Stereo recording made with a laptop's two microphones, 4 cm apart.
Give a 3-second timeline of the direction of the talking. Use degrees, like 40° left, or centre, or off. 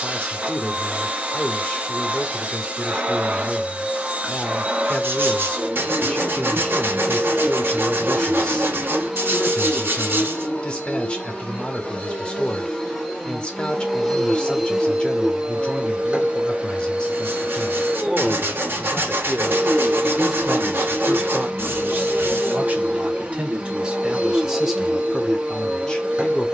20° left, 20° left, 20° left, 20° left, 20° left, 20° left, centre, 30° right, centre.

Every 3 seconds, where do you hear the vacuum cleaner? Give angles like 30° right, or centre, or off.
30° right, 30° right, 30° right, 20° left, 10° left, 20° right, 20° right, 20° right, 20° right.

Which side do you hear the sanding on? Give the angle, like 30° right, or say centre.
60° right.